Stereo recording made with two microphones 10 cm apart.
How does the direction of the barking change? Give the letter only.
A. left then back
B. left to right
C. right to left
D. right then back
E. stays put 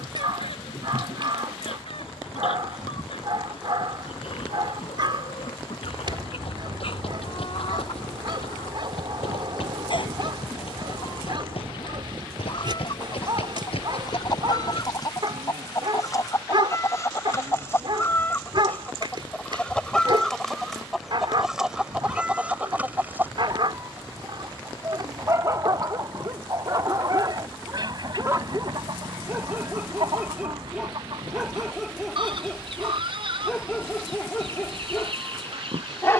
C.